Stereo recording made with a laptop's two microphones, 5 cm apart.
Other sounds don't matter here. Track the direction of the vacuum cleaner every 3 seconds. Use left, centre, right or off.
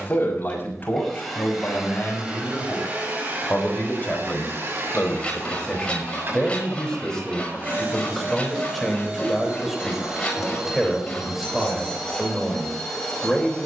centre, right, right, centre, centre.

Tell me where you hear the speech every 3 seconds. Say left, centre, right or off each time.
left, left, centre, centre, centre.